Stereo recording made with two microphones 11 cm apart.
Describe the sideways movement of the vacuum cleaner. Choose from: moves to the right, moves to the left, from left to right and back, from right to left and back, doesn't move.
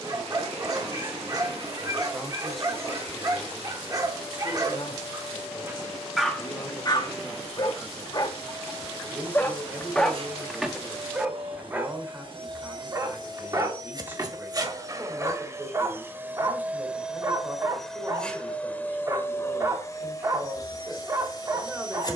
moves to the left.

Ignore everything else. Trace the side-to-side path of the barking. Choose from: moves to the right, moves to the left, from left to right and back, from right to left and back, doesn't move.
from right to left and back.